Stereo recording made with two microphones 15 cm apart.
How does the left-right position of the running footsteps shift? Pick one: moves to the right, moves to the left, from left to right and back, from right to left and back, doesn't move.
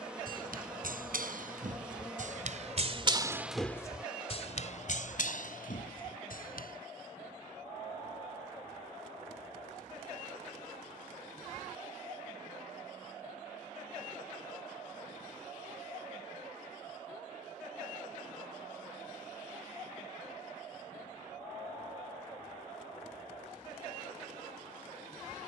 moves to the left.